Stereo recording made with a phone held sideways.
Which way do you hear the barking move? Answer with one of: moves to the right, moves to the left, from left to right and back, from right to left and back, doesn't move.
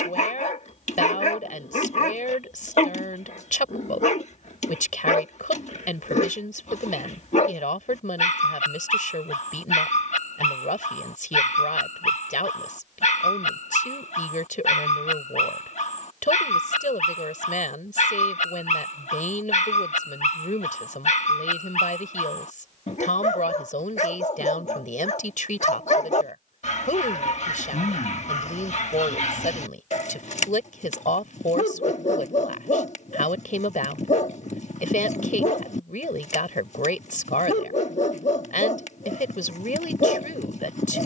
doesn't move.